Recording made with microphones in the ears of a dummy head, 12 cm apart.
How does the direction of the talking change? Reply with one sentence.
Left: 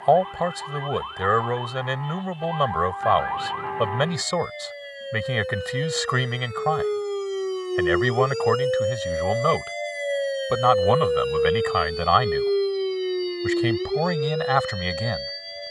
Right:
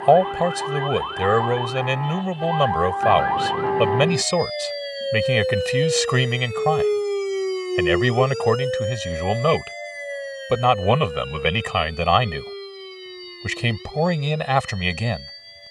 You can hear the talking stay in one place.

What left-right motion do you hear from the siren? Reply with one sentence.
In this clip you hear the siren travel towards the left.